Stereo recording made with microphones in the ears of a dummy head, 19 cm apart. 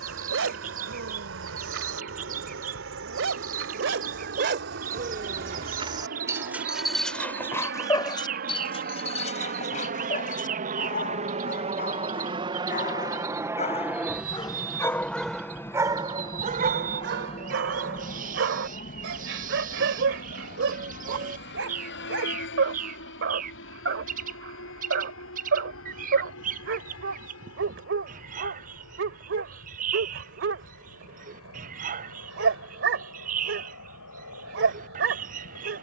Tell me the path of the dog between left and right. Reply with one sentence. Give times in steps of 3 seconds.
You can hear the dog on the right from 0 s, in the centre from 6 s, on the left from 9 s and on the right from 15 s.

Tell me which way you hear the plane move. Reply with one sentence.
In this clip you hear the plane travel towards the left.